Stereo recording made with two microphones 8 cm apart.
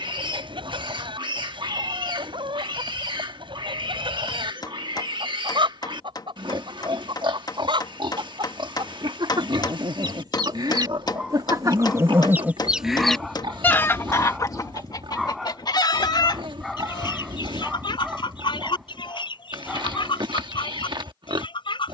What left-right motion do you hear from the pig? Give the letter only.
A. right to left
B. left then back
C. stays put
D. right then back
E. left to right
C.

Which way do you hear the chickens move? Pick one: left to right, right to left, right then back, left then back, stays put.
right to left.